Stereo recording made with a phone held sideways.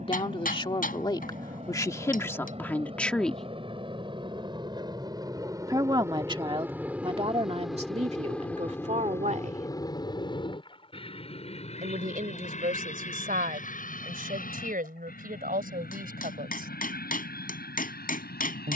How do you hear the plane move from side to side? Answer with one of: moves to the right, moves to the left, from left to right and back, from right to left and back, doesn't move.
moves to the left.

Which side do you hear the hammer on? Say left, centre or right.
left.